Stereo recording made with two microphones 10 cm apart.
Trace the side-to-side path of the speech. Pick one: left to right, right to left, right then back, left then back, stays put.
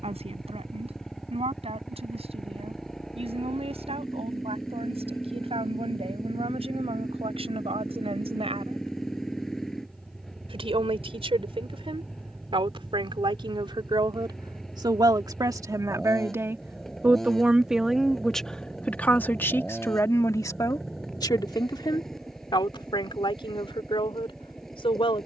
right to left.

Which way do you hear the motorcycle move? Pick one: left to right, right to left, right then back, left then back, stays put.
stays put.